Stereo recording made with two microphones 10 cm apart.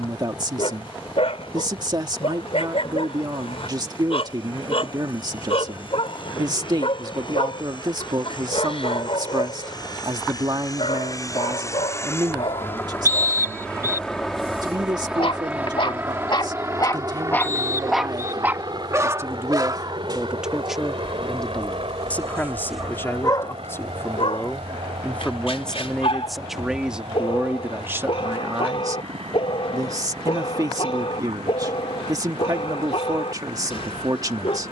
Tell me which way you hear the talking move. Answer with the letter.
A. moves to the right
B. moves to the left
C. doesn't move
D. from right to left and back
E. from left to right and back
D.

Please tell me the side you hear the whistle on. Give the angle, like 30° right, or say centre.
30° right.